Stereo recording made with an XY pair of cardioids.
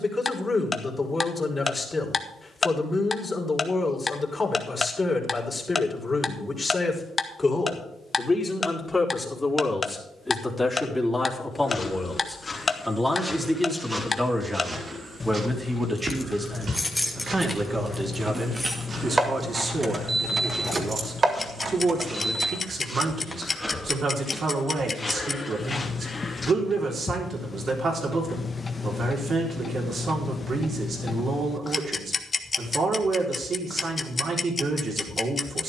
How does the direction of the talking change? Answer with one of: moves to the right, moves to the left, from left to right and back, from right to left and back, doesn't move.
moves to the right.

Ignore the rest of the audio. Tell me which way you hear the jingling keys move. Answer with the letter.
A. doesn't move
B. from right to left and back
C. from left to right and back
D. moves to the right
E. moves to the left
D.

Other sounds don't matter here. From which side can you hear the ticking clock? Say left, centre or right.
left.